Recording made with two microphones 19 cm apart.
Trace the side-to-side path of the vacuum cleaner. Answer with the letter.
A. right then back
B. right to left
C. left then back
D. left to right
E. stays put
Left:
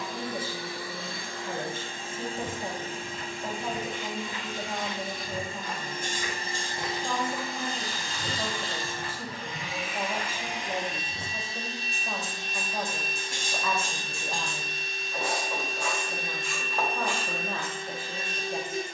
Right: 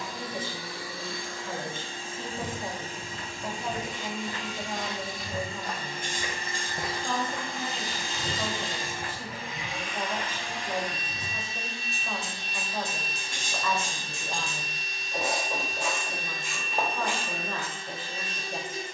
A.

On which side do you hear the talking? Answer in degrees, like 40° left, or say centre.
10° left.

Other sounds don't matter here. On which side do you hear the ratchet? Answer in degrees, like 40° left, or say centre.
20° right.